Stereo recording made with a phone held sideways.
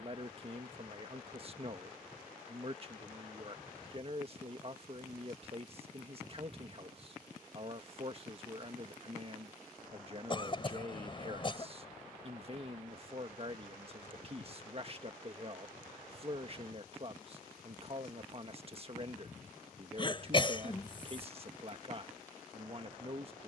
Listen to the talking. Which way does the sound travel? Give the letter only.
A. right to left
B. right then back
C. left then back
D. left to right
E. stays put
E.